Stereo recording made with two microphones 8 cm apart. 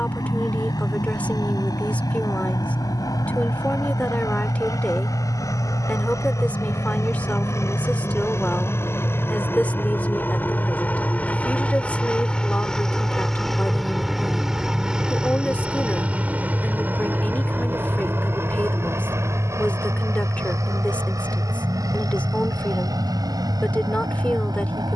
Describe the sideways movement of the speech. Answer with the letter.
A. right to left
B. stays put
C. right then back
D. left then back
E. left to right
B.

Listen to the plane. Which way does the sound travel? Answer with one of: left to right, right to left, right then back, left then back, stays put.
left to right.